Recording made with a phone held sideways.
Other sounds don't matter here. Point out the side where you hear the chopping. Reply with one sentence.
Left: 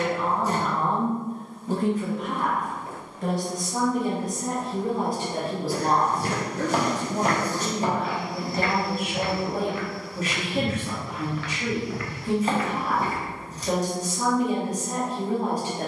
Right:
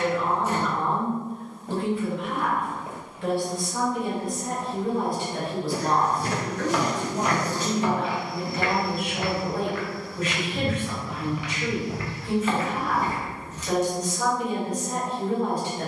In this clip you hear the chopping on the left.